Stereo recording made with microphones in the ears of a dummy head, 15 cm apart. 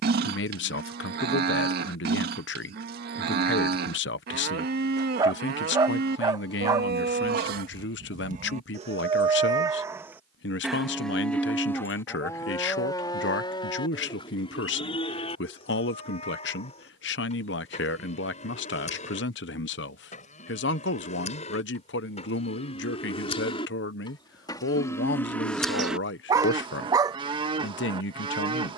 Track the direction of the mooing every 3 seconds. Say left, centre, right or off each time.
right, right, right, centre, left, left, left, left, centre, right.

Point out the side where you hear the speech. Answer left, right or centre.
left.